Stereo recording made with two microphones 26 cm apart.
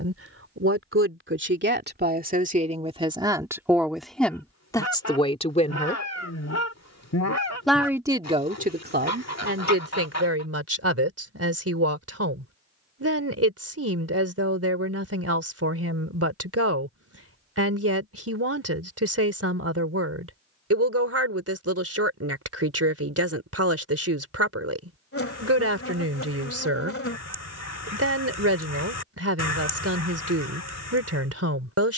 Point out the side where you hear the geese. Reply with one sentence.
In this clip you hear the geese on the left.